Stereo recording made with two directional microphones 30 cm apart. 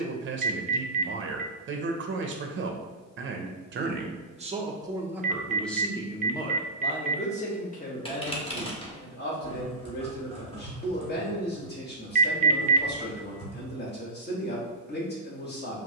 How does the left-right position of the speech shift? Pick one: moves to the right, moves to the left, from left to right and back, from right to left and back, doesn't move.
moves to the left.